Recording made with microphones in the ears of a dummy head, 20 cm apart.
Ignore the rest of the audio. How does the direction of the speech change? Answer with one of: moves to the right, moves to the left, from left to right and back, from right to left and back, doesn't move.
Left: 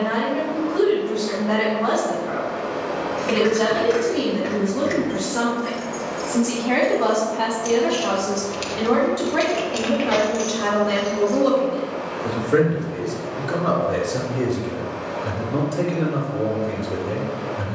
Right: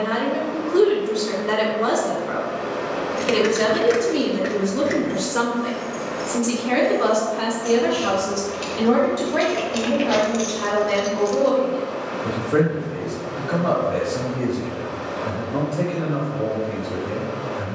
moves to the left.